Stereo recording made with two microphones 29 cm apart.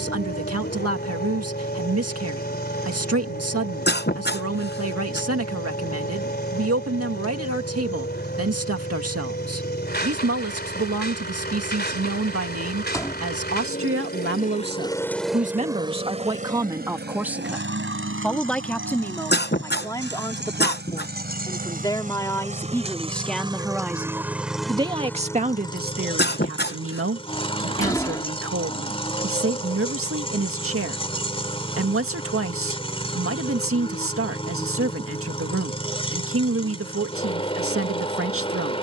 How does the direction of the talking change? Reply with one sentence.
You can hear the talking go left and come back.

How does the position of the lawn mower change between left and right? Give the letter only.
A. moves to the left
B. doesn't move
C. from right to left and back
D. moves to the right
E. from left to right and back
E.